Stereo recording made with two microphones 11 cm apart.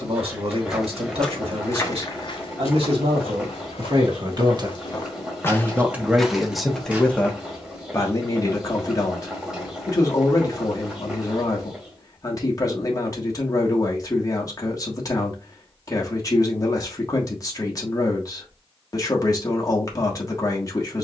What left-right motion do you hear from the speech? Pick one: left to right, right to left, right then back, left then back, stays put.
right to left.